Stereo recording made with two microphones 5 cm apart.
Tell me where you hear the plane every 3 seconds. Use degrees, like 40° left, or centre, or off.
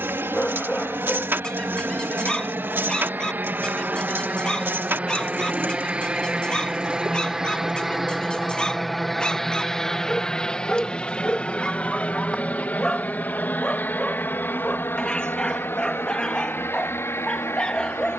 50° right, 30° right, 10° right, 10° left, 30° left, 50° left.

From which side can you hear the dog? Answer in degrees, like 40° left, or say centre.
20° left.